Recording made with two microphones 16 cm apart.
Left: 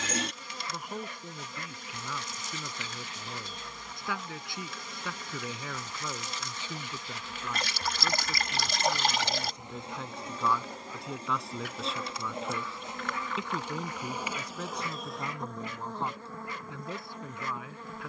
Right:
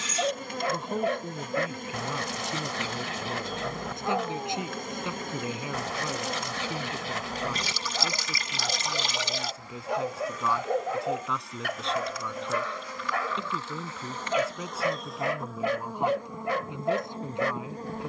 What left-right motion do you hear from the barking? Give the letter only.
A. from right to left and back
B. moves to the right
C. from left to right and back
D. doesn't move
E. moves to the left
D.